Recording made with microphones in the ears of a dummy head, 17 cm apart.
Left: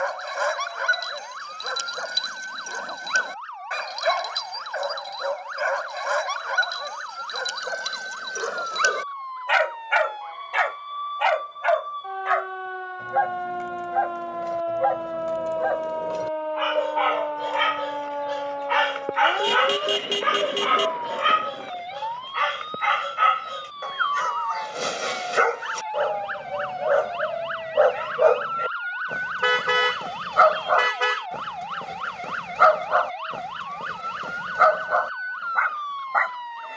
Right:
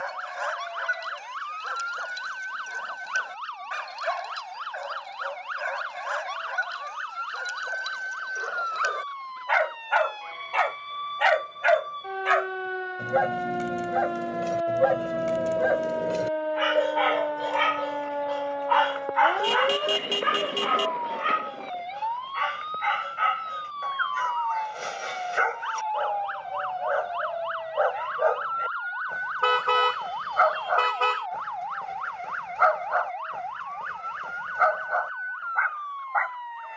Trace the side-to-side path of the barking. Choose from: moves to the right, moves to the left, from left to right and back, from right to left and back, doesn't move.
from left to right and back.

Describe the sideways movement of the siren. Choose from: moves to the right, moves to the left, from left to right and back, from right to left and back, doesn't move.
moves to the left.